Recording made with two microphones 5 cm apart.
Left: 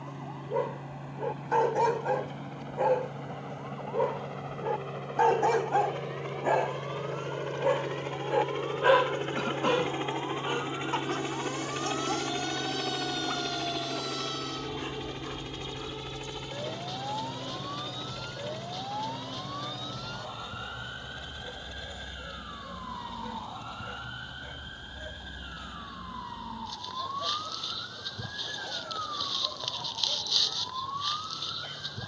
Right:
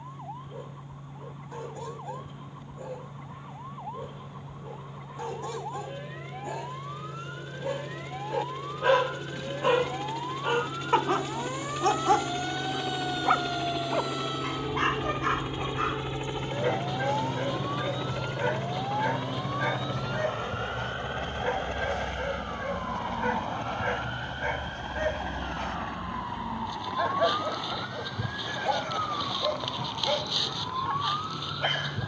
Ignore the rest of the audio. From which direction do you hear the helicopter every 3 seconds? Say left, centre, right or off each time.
left, left, left, left, centre, right, right, right, right, right, right.